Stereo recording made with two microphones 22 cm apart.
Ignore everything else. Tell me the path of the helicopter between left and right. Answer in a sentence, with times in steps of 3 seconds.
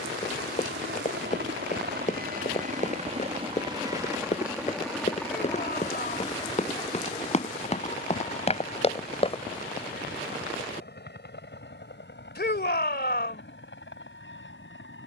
You can hear the helicopter on the right from 0 s, in the centre from 3 s and on the left from 6 s.